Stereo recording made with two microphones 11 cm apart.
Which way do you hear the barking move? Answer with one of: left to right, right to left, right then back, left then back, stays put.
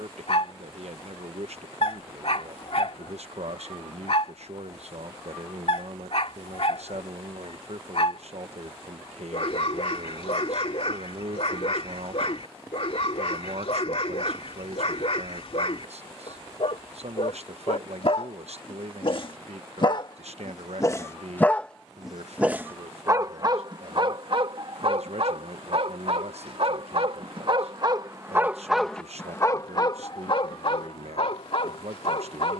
right then back.